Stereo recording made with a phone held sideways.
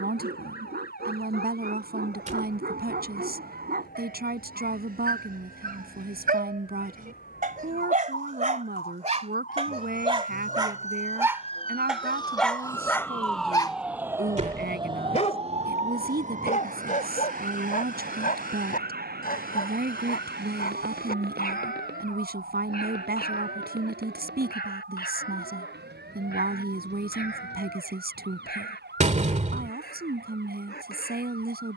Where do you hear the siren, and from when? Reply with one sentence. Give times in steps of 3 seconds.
You can hear the siren on the left from 0 s, in the centre from 12 s and on the right from 15 s.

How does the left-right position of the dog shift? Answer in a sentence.
You can hear the dog go from the right side to the left.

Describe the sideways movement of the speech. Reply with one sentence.
In this clip you hear the speech stay put.